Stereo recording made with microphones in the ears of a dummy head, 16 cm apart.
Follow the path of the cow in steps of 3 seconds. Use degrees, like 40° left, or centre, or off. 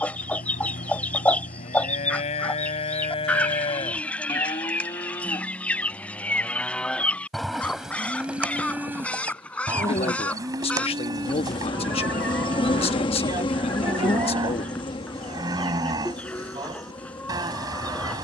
40° left, 20° left, centre, 20° right, 20° right, 20° right.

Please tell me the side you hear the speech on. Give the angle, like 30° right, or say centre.
30° left.